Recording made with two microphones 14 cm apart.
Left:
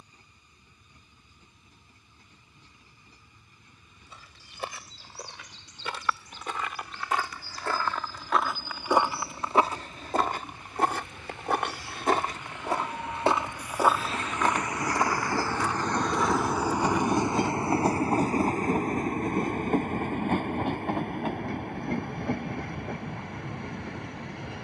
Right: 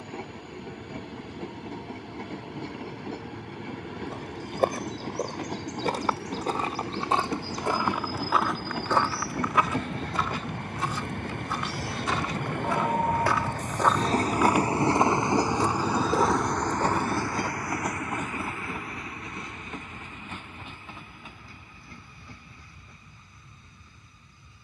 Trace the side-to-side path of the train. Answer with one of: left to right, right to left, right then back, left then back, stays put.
right to left.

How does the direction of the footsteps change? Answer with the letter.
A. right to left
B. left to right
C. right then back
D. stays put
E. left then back
E.